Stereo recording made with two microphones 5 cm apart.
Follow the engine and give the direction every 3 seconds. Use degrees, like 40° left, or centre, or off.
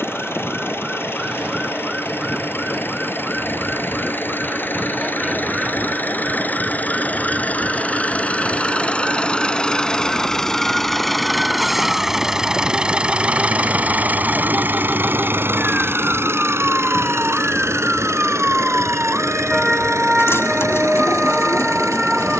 50° left, 40° left, 30° left, 10° left, 20° right, 60° right, 70° right, 80° right.